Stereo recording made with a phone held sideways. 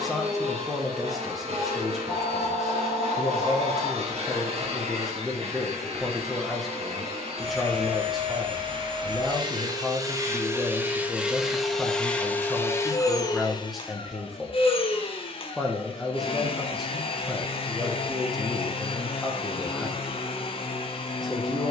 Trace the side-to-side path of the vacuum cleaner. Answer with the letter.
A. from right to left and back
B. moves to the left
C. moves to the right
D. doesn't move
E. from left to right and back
B.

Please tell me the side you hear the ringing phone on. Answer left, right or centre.
centre.